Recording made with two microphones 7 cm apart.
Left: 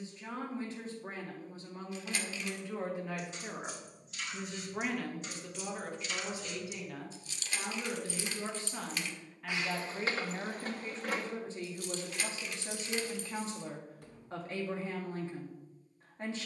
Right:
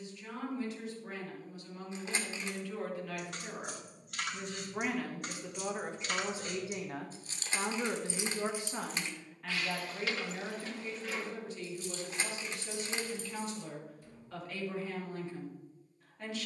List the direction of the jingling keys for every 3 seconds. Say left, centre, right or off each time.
off, right, right, left, left, off.